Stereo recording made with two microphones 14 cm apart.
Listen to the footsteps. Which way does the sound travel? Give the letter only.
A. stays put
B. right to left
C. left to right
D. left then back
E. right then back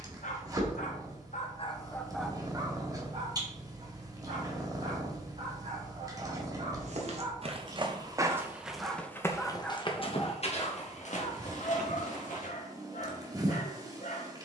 B.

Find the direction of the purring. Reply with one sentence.
In this clip you hear the purring on the right.